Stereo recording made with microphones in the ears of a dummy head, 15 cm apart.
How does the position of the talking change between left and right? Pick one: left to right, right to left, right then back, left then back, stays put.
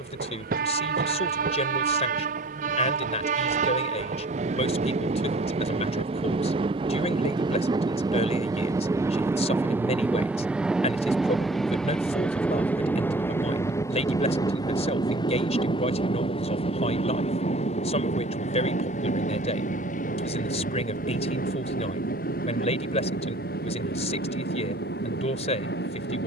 stays put.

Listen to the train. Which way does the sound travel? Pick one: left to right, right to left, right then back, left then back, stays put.
right to left.